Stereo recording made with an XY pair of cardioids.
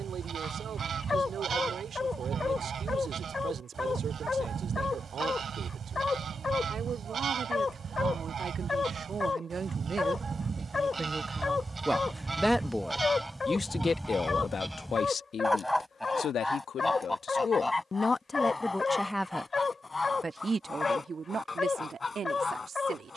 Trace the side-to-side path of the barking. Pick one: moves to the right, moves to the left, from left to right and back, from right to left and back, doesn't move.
doesn't move.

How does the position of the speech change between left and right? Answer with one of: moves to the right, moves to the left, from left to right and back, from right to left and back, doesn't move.
from right to left and back.